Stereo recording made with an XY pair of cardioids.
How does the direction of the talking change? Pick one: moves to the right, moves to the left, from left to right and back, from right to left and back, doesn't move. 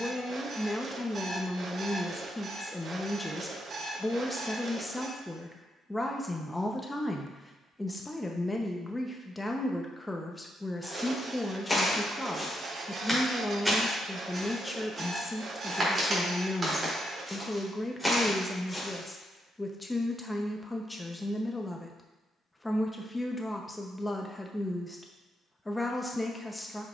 doesn't move.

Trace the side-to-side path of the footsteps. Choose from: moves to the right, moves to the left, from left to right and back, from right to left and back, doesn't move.
from left to right and back.